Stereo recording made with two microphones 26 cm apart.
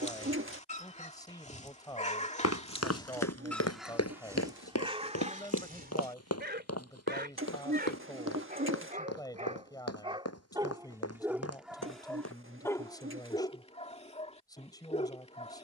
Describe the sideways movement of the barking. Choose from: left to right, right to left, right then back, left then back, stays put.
right then back.